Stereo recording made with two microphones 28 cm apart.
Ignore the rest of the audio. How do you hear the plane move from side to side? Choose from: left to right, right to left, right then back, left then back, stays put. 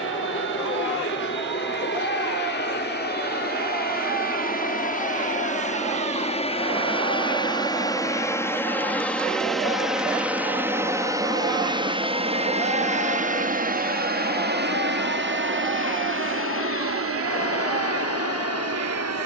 left to right.